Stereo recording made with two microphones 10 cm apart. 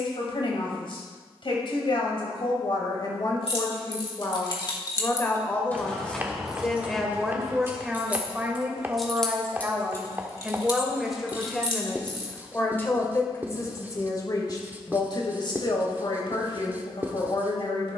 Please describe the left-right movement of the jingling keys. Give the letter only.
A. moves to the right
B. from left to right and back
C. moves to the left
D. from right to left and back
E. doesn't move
B.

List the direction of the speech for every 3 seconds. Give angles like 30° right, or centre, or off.
50° left, 30° left, 10° right, 10° right, 30° left, 50° left.